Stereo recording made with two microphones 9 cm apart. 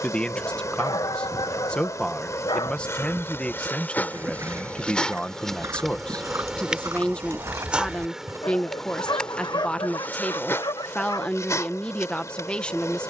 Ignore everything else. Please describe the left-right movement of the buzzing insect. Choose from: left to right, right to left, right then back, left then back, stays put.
right then back.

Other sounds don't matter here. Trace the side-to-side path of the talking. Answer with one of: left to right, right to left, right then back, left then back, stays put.
stays put.